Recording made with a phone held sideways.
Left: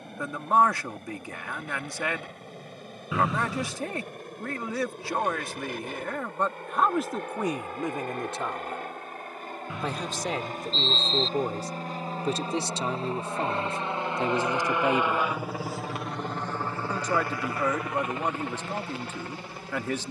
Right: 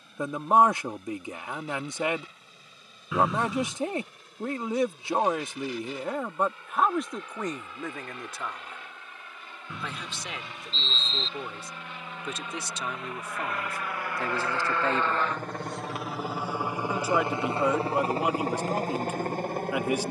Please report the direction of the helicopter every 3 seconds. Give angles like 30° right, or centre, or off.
60° left, 60° left, 50° left, 50° left, 30° left, 10° right, 50° right.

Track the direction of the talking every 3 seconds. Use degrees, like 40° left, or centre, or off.
20° right, 20° right, 10° left, 40° left, 30° left, 10° right, 10° right.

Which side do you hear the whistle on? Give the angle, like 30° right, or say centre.
centre.